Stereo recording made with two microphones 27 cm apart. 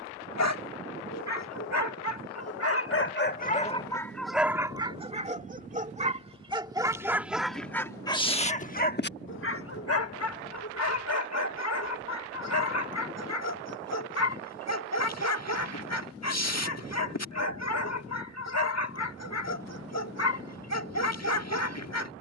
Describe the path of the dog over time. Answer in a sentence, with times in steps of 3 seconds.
You can hear the dog on the left from 0 s, in the centre from 3 s and on the left from 9 s.